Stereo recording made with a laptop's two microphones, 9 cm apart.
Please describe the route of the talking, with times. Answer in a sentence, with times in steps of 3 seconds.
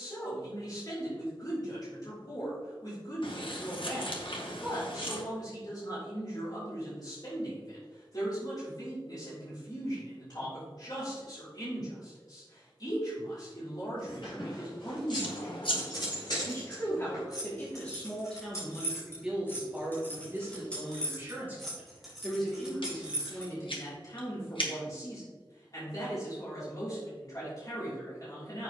In this clip you hear the talking on the left from 0 s, in the centre from 18 s and on the left from 24 s.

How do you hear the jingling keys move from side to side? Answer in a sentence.
In this clip you hear the jingling keys go from the left side to the right.